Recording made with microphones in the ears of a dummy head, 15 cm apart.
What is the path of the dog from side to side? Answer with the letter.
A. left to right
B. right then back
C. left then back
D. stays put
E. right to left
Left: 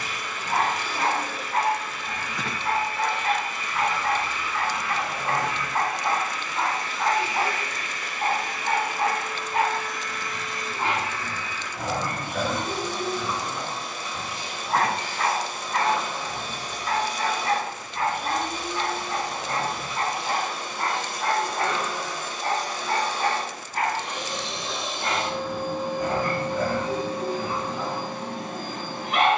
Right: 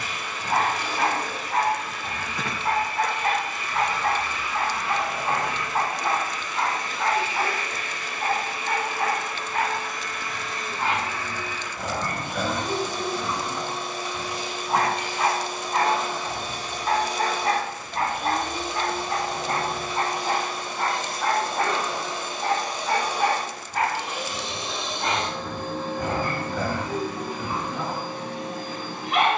C.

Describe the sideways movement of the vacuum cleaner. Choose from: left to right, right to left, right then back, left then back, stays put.
right to left.